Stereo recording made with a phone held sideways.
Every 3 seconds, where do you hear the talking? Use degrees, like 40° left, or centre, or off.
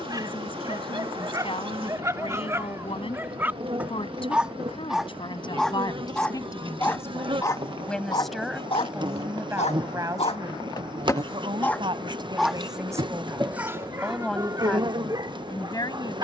40° left, 30° left, 10° left, 20° right, 10° right, 20° left.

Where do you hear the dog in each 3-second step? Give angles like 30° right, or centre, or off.
20° right, 10° right, 20° left, 30° left, 10° right, 30° right.